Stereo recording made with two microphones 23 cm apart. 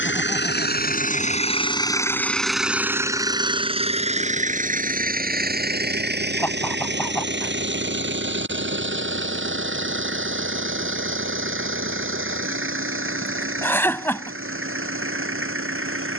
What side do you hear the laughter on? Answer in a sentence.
You can hear the laughter in the centre.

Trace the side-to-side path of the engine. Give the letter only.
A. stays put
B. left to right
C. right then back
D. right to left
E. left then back
B.